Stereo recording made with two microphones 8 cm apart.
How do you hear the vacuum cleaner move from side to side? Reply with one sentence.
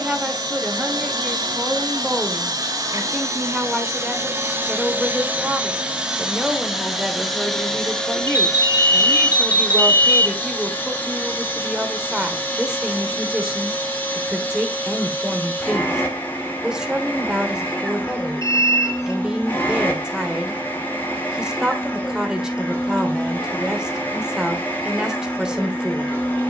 In this clip you hear the vacuum cleaner move from right to left.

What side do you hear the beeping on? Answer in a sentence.
You can hear the beeping on the left.